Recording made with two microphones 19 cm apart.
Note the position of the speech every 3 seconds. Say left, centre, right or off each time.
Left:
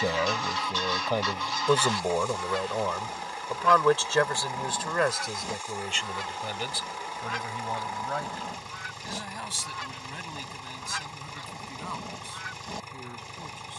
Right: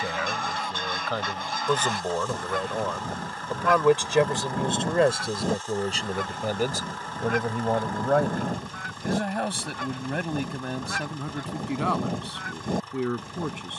centre, right, right, right, right.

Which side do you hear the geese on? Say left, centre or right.
right.